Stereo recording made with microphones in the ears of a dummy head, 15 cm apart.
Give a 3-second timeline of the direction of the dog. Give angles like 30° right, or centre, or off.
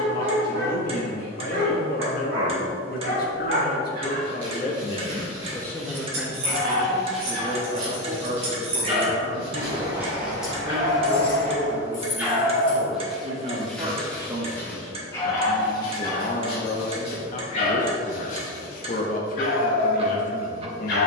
60° right, 50° right, 40° right, 20° right, centre, 30° left, 50° left.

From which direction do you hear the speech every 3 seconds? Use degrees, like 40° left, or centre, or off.
50° left, 40° left, 30° right, 50° right, 30° right, 40° left, 40° left.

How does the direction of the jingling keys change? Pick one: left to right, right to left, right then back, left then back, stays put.
right to left.